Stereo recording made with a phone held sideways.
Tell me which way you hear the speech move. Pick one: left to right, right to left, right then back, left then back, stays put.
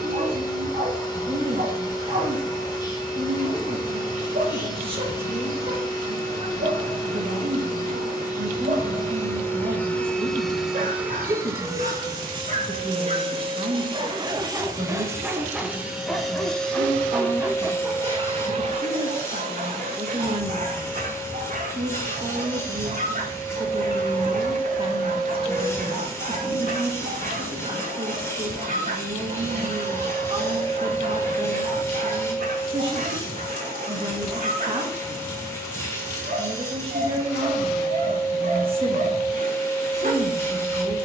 stays put.